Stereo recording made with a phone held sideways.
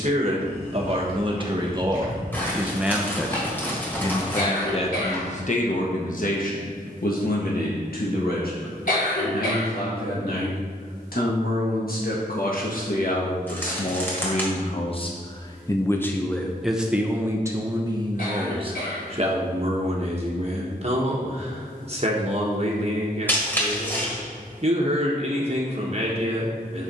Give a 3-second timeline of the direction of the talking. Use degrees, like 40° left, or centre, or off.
30° right, 30° left, 70° left, 80° left, 60° left, centre, 40° right, 40° right, 40° right.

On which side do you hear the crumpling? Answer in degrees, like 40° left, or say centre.
10° left.